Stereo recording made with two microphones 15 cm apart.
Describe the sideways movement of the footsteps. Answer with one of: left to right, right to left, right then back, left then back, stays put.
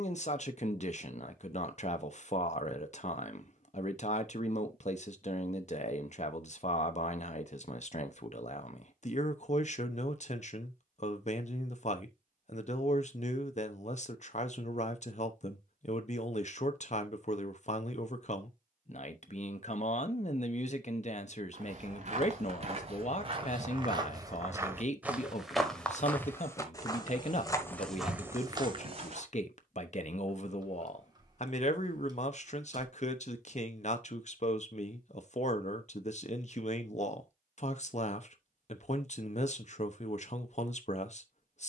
left then back.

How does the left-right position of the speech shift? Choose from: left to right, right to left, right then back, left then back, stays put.
stays put.